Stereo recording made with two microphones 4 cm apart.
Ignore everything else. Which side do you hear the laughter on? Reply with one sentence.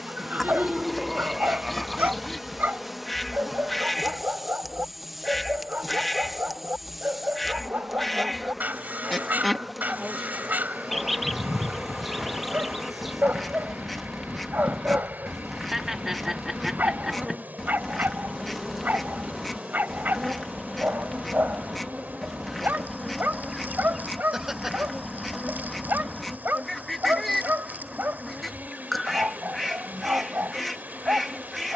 You can hear the laughter in the centre.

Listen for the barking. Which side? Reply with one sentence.
You can hear the barking on the right.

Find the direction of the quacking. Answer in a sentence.
In this clip you hear the quacking in the centre.